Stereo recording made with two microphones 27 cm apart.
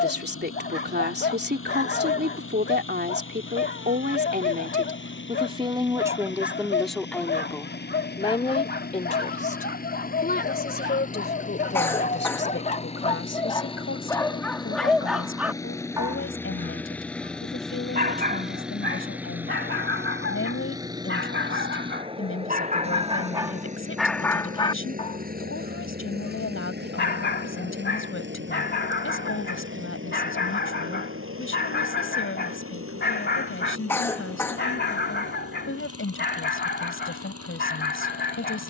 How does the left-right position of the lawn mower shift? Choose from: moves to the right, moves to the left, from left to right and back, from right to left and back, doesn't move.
moves to the right.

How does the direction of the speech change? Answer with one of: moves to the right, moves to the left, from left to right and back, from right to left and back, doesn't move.
moves to the left.